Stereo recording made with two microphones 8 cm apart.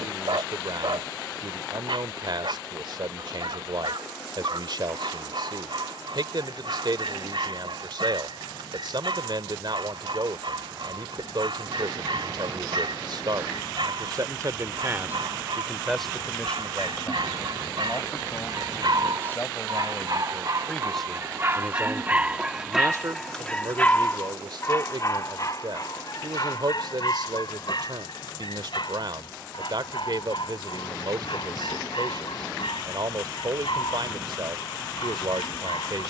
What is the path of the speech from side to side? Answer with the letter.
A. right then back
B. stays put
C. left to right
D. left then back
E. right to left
D.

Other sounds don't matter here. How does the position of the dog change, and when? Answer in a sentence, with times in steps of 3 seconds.
You can hear the dog on the right from 0 s, in the centre from 21 s and on the left from 24 s.